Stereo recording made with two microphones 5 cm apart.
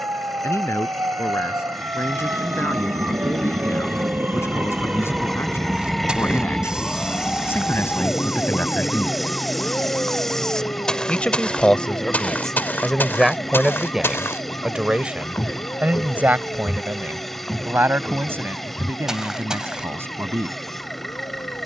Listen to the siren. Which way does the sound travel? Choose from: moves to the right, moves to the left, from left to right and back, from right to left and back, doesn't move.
moves to the left.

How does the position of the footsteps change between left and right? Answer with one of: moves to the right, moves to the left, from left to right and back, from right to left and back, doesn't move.
from right to left and back.